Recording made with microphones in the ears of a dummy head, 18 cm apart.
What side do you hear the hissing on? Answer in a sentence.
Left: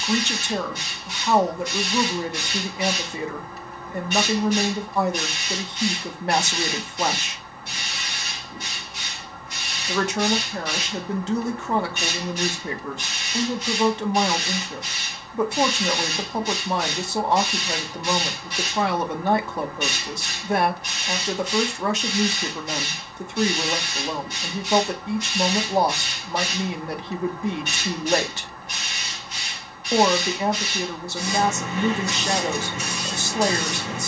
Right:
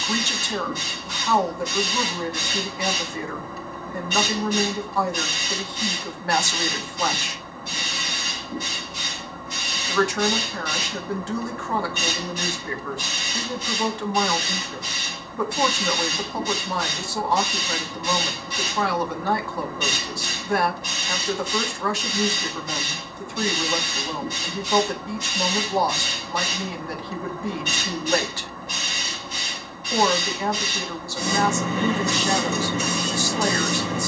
In this clip you hear the hissing on the right.